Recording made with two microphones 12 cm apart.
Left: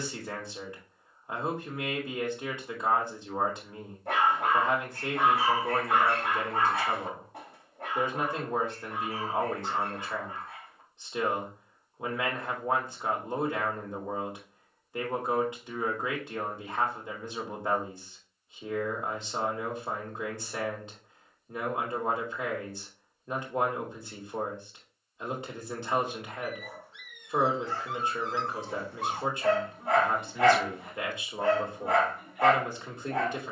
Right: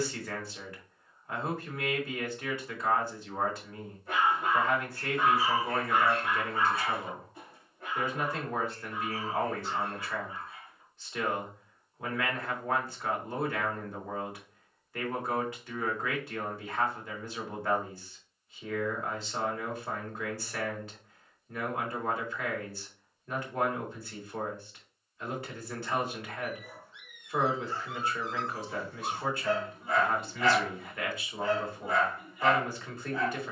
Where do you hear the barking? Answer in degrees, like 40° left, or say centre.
70° left.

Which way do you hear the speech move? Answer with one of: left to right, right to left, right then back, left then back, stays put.
stays put.